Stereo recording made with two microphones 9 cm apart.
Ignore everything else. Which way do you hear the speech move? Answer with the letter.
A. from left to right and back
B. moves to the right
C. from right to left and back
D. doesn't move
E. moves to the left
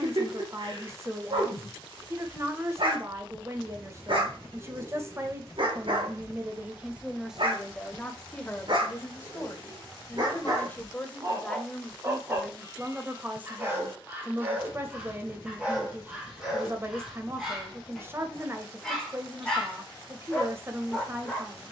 C.